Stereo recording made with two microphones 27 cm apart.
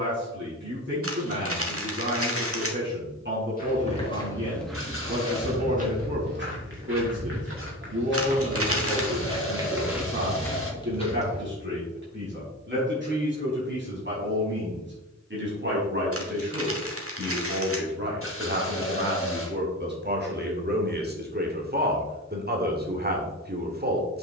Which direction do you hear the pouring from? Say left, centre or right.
left.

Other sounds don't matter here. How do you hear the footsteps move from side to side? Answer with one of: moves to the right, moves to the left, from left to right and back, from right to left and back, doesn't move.
from left to right and back.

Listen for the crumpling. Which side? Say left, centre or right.
right.